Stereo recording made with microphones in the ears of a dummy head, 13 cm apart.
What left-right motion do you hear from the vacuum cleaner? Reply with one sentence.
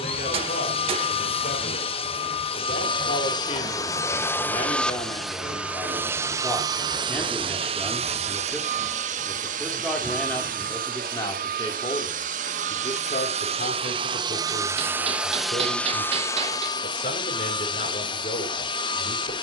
You can hear the vacuum cleaner move from left to right and back again.